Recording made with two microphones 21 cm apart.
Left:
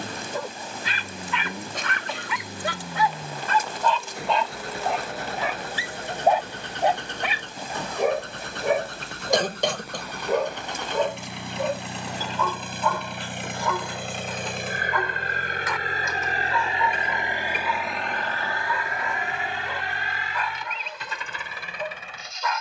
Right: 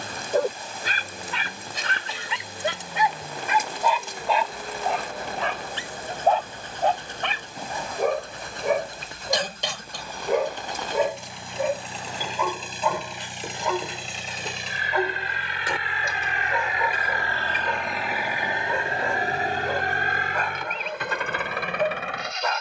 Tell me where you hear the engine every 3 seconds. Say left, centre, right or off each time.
left, left, left, left, left, left, right, right.